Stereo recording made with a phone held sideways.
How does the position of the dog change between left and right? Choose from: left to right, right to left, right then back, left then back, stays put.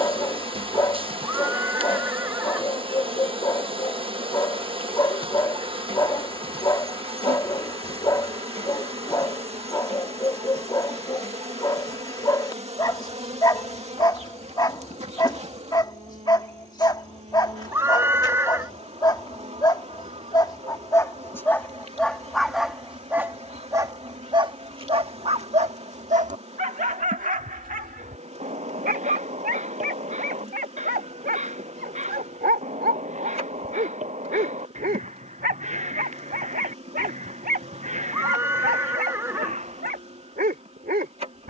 left to right.